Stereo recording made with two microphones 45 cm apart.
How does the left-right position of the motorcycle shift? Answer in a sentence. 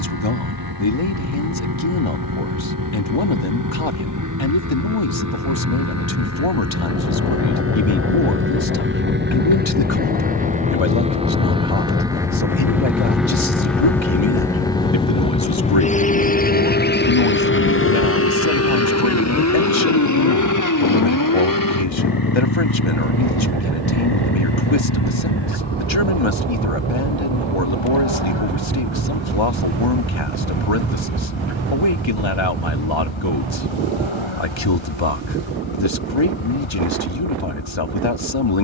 In this clip you hear the motorcycle go from the right side to the left.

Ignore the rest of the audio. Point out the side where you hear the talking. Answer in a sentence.
In this clip you hear the talking on the left.